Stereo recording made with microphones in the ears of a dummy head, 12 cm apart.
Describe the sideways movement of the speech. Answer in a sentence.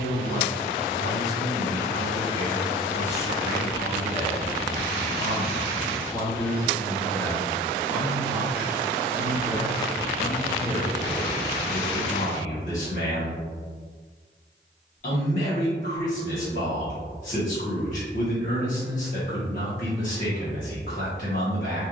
You can hear the speech go right and come back.